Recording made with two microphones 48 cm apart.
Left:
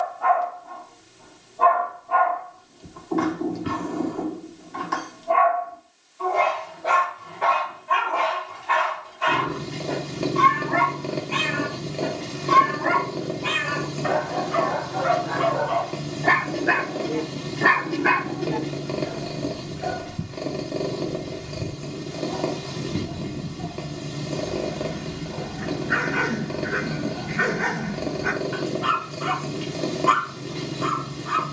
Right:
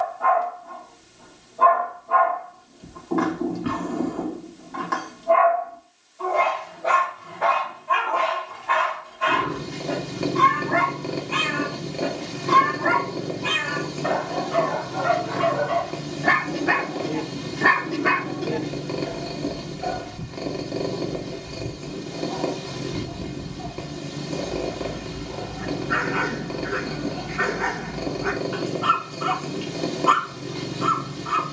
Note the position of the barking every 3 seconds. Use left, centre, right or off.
right, right, right, right, right, right, left, left, left, left, left.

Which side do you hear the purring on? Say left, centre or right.
centre.